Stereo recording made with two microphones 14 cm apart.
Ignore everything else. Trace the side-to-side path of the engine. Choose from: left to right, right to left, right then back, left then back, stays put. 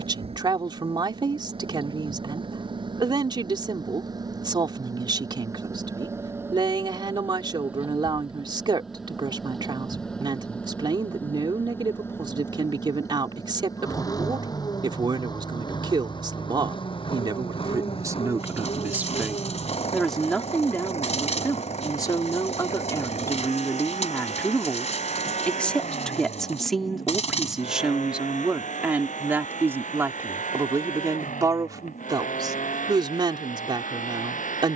right to left.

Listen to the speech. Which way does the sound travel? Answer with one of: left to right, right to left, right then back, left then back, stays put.
left then back.